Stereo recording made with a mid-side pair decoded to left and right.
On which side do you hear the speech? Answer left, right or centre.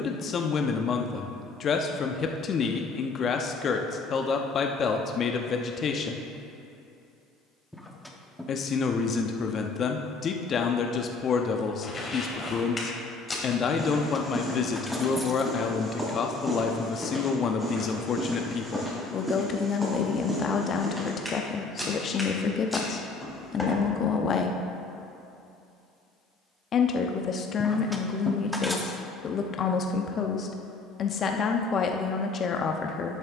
left.